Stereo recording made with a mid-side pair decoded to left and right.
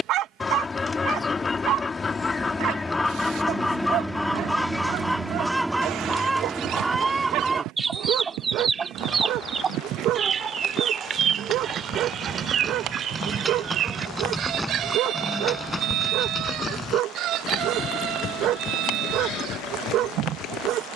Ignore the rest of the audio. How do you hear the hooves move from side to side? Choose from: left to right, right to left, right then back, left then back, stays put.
right to left.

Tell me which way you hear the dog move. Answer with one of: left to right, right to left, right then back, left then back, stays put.
stays put.